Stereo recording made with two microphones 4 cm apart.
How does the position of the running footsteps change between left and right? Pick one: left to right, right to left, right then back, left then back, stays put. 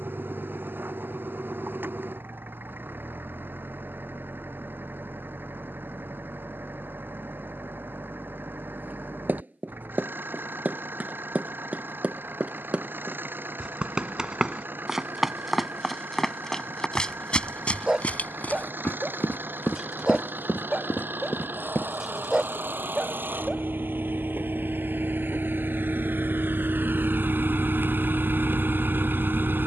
right to left.